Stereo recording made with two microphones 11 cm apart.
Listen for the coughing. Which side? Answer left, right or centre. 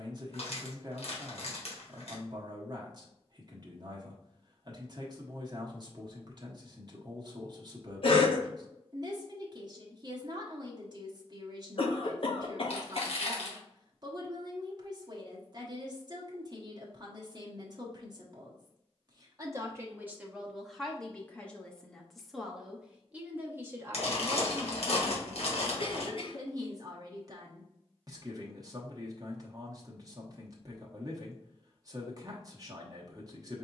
left.